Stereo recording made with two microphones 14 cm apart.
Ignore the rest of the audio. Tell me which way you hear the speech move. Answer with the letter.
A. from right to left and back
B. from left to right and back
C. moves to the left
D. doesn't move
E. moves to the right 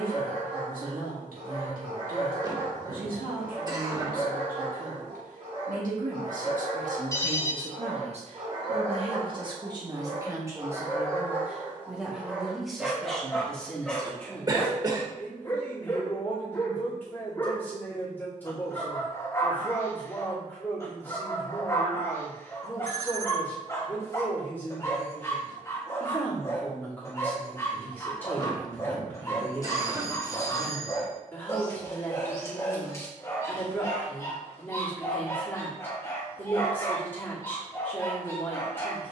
C.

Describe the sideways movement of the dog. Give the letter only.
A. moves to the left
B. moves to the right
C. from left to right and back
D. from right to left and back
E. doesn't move
A.